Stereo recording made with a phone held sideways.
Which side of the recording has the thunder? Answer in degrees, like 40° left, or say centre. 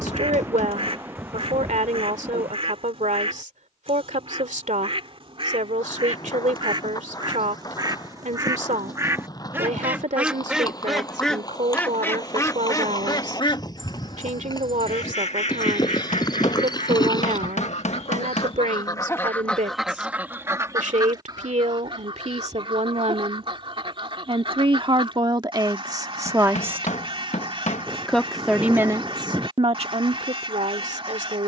10° right.